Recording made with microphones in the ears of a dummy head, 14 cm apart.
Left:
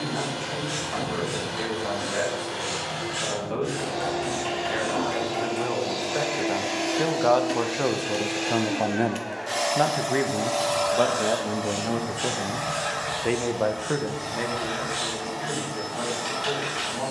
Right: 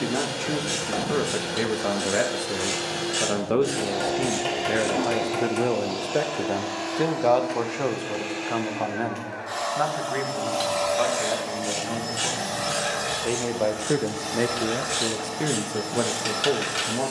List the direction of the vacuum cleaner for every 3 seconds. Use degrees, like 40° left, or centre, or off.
50° right, 20° right, 30° left, centre, 50° right, 50° right.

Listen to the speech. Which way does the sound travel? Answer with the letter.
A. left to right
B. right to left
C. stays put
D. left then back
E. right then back
D.